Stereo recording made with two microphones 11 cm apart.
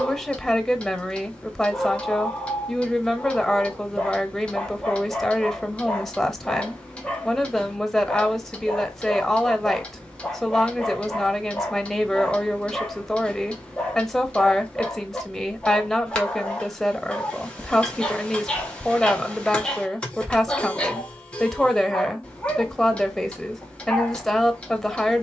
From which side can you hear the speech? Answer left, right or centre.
centre.